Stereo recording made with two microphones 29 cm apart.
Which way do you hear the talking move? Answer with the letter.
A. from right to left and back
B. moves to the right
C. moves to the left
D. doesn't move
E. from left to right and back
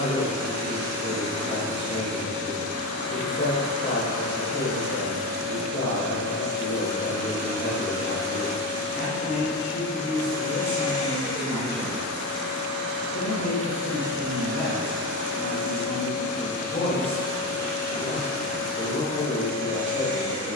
D.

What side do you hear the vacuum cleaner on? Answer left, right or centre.
right.